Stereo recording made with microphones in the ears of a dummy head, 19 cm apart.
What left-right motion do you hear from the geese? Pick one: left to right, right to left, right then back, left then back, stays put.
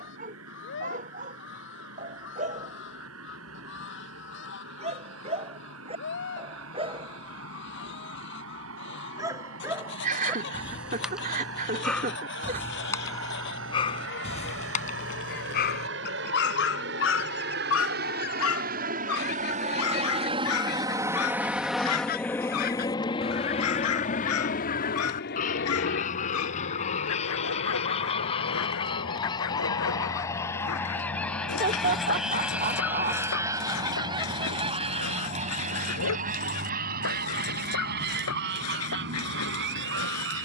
left to right.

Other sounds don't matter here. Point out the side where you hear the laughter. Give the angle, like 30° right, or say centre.
40° right.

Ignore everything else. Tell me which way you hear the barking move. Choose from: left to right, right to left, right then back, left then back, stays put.
right to left.